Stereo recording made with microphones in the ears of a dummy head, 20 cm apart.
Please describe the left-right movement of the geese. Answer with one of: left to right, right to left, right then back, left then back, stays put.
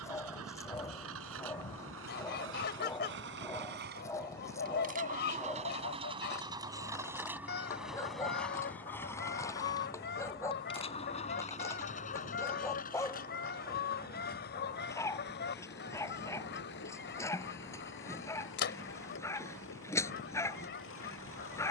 stays put.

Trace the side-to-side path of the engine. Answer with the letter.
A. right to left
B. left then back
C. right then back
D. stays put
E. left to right
A.